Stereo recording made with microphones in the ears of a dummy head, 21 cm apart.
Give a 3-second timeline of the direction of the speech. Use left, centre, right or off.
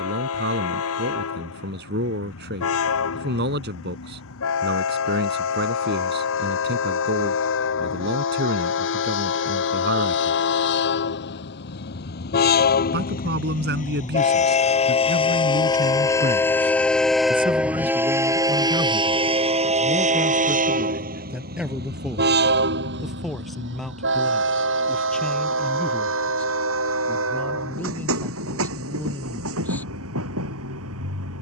right, right, right, right, right, right, centre, centre, centre, centre, off.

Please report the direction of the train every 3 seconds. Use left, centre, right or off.
left, left, left, left, left, centre, right, right, right, right, right.